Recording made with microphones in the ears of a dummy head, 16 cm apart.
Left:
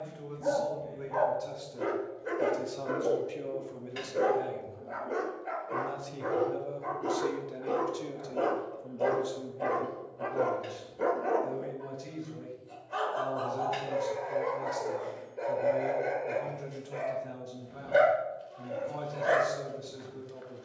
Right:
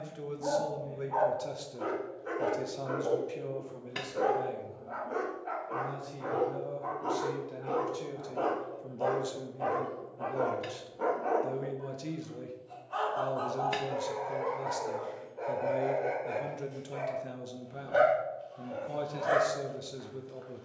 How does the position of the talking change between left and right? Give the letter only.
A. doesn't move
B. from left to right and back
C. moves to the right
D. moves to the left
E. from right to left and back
E.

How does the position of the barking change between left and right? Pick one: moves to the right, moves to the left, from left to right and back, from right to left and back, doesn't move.
doesn't move.